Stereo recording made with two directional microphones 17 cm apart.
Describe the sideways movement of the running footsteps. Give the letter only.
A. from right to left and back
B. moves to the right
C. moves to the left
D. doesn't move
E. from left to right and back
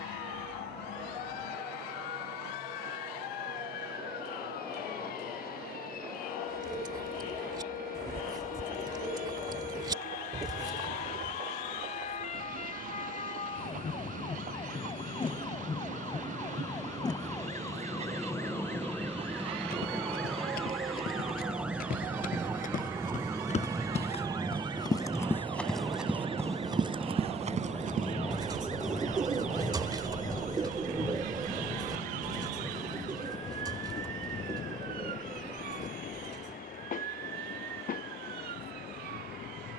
B.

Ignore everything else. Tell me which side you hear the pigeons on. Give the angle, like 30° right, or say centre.
20° right.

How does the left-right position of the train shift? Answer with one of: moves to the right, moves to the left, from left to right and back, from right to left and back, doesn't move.
moves to the left.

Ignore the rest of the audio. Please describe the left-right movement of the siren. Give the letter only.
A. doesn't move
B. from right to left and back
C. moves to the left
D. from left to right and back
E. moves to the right
E.